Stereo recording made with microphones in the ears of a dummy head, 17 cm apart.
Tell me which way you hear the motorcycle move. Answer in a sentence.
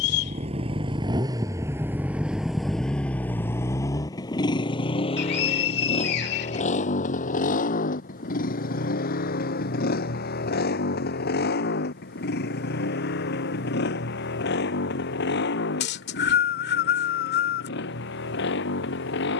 You can hear the motorcycle move from right to left.